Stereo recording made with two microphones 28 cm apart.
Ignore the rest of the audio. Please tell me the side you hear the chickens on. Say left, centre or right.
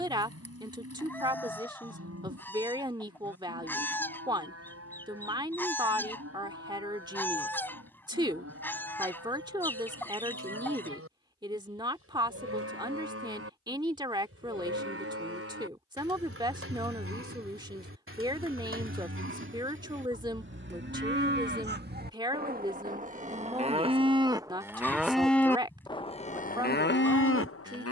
centre.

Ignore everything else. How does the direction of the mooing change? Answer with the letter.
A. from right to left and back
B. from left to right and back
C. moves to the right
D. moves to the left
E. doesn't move
D.